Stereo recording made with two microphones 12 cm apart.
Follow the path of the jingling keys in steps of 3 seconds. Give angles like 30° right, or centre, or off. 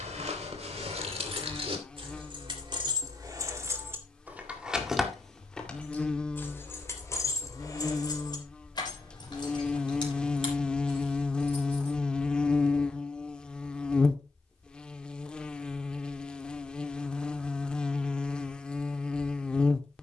50° right, 10° right, 30° left, 40° left, off, off, off.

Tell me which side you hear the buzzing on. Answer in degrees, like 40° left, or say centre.
10° left.